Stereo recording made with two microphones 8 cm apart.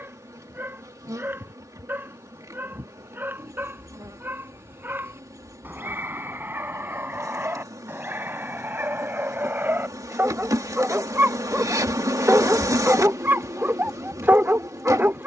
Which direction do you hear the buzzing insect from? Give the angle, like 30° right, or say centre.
40° right.